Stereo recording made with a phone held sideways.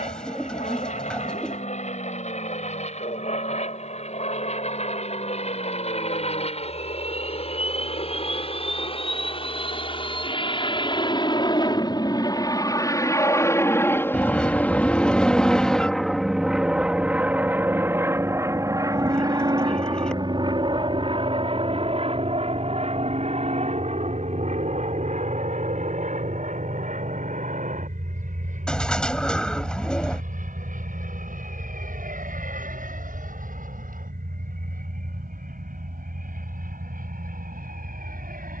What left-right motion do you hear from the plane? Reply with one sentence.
In this clip you hear the plane move to the right.